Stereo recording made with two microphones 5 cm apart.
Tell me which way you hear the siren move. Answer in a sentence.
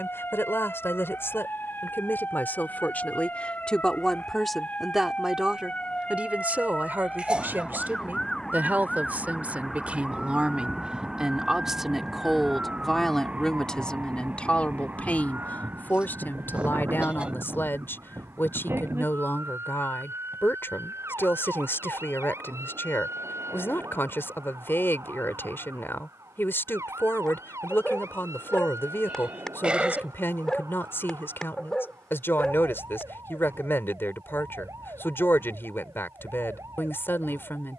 In this clip you hear the siren move from left to right.